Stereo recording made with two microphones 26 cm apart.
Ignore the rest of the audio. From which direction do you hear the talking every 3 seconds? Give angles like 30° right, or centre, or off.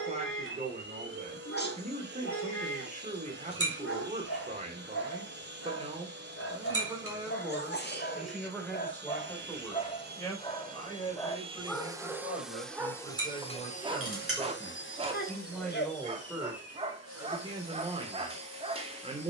30° right, 30° right, centre, 10° left, 20° left, 10° right, 20° right.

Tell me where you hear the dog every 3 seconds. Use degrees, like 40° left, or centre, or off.
50° left, 50° left, 50° left, 20° left, 20° right, 20° right, 20° right.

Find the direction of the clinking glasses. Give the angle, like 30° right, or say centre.
60° right.